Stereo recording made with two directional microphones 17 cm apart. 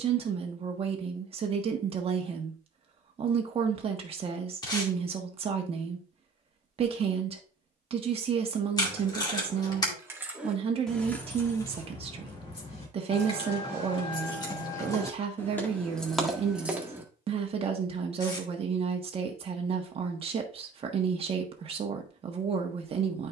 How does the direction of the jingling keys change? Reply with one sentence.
You can hear the jingling keys go left and come back.